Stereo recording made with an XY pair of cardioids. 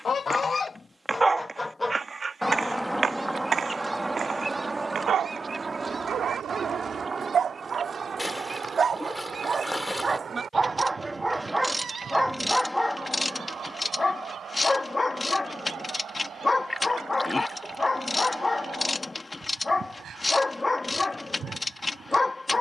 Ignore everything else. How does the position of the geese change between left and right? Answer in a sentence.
You can hear the geese move to the right.